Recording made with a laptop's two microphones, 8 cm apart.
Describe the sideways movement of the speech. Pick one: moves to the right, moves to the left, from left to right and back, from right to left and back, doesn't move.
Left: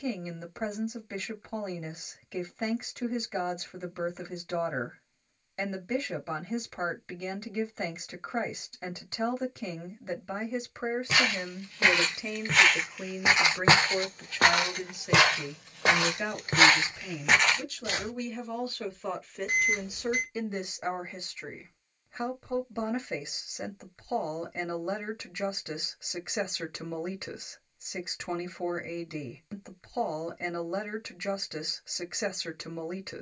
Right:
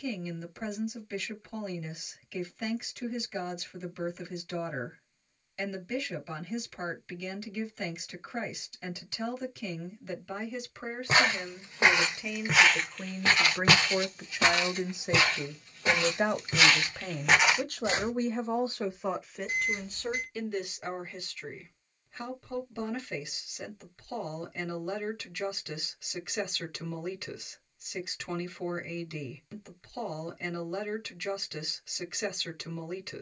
from left to right and back.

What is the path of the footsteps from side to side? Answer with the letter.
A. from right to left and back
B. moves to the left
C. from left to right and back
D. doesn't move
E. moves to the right
A.